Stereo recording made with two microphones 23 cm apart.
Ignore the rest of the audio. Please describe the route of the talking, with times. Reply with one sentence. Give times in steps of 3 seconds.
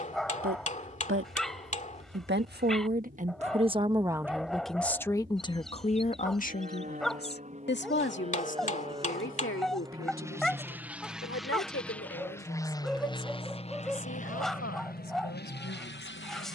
In this clip you hear the talking on the right from 0 s, in the centre from 3 s and on the left from 6 s.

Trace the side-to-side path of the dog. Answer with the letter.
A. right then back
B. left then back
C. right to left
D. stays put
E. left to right
D.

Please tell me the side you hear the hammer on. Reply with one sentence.
You can hear the hammer on the left.